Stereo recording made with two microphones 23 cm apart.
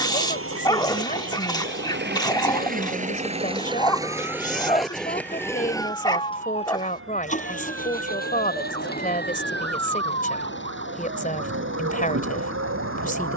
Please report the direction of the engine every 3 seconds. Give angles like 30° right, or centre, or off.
50° right, 10° right, 30° left, 50° left, 50° left.